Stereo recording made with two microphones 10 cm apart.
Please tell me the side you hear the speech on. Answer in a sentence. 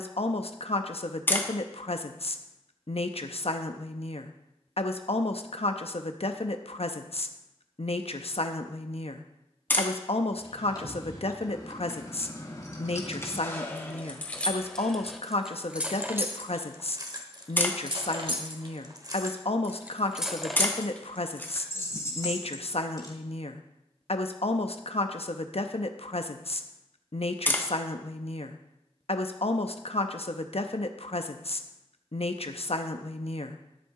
You can hear the speech on the left.